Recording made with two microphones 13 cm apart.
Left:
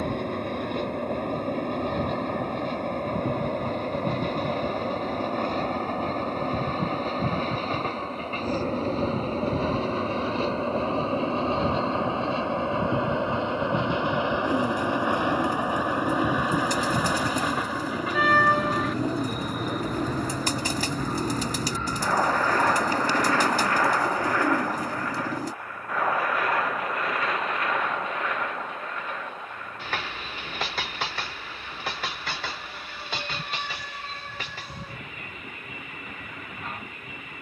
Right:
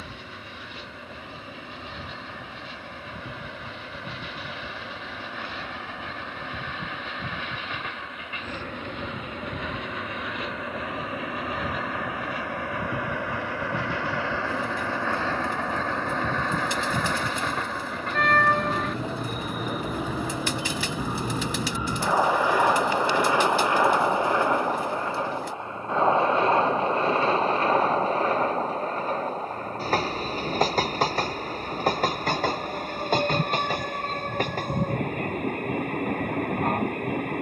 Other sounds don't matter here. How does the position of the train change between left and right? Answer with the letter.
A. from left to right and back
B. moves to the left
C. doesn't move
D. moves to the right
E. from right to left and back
D.